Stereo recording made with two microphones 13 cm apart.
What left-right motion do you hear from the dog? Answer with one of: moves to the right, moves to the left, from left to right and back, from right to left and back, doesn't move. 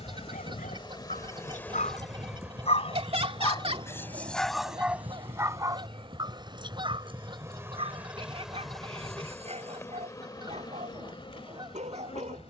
moves to the right.